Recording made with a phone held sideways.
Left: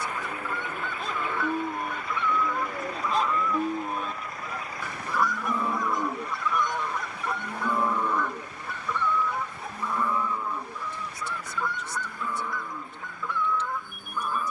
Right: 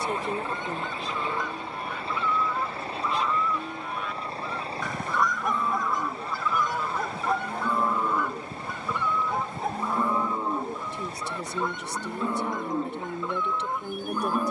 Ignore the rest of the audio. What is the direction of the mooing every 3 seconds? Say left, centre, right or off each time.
left, left, centre, right, right.